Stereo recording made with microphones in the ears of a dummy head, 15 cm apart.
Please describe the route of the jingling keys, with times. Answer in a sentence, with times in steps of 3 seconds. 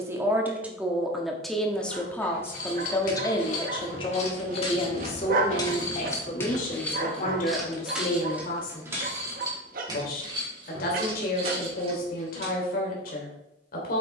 In this clip you hear the jingling keys on the left from 0 s, in the centre from 6 s and on the right from 9 s.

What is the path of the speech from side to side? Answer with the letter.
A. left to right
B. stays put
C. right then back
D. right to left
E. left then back
D.